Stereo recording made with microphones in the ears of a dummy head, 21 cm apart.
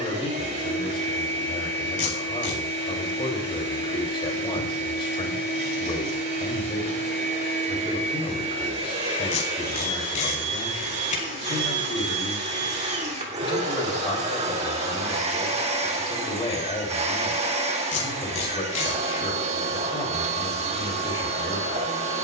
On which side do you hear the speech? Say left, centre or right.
left.